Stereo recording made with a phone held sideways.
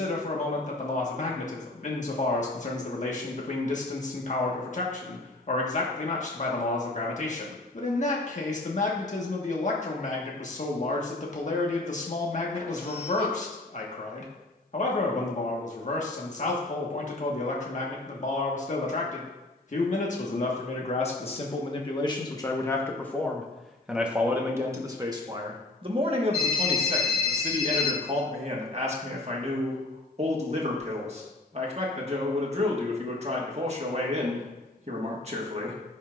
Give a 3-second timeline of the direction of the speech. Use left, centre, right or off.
left, left, left, left, left, left, left, left, right, right, right, right.